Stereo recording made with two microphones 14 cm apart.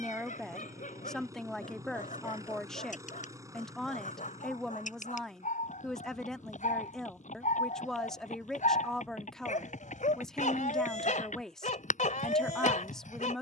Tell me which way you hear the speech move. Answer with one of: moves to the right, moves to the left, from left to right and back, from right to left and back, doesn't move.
doesn't move.